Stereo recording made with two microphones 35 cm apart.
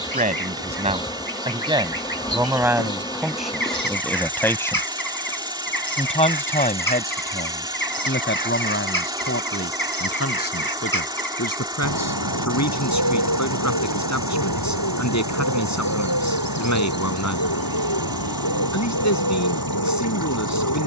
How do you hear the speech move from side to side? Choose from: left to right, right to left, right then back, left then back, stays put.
right to left.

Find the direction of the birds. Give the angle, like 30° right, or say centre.
70° left.